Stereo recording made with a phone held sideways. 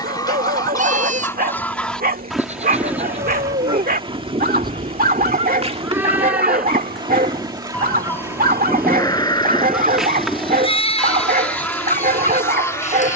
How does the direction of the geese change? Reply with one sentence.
You can hear the geese move from left to right and back again.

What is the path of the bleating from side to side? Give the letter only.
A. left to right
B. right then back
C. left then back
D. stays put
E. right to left
E.